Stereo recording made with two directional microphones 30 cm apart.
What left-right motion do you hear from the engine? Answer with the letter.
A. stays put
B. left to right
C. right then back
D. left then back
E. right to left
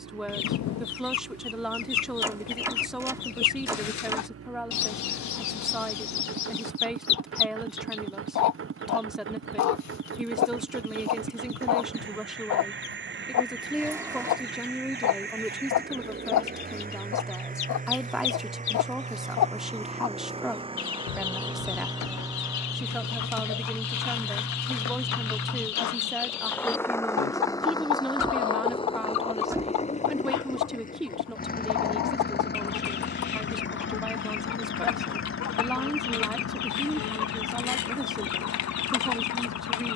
E.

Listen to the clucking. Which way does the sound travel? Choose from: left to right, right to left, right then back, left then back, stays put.
stays put.